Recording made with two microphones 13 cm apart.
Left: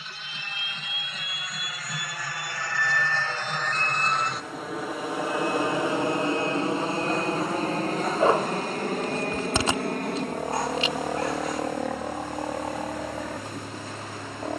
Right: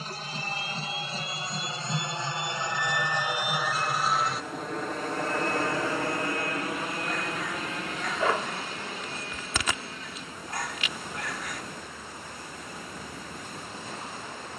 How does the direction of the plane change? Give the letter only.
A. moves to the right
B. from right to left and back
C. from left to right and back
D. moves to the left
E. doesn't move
D.